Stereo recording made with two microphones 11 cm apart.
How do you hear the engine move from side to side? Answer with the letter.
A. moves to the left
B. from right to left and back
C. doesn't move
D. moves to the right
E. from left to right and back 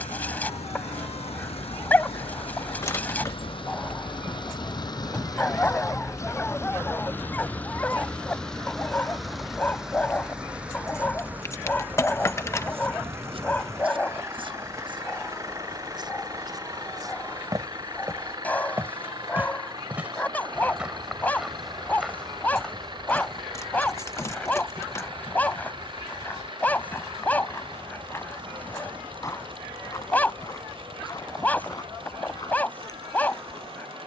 D.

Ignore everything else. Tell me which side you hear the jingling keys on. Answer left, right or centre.
left.